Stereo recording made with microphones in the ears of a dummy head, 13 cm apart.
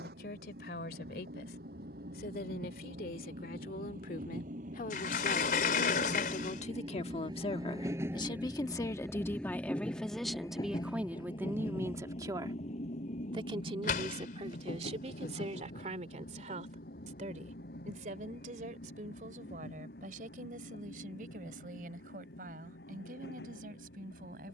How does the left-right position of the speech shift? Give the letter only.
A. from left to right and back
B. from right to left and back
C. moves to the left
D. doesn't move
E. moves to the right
E.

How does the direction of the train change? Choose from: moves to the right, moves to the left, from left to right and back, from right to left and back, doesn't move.
moves to the left.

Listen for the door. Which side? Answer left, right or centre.
left.